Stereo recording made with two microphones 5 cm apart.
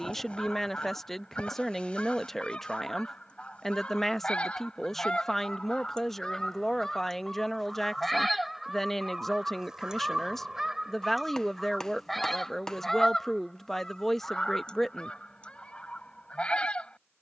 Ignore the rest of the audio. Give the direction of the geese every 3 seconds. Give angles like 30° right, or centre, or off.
20° left, 20° left, centre, 10° right, 10° left, 20° left.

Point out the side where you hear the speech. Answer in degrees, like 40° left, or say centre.
10° left.